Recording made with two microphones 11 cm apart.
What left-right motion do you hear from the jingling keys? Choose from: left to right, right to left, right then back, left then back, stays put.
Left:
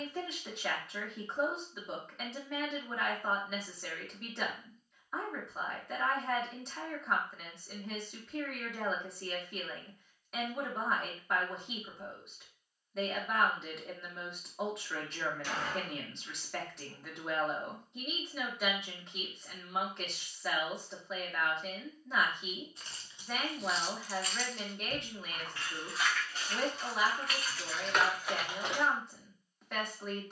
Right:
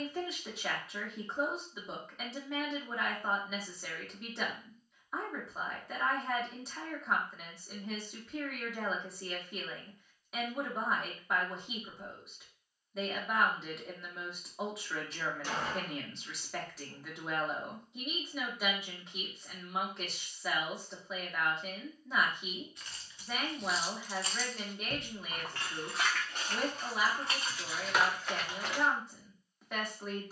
right then back.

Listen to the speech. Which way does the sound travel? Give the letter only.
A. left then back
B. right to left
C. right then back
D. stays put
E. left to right
D.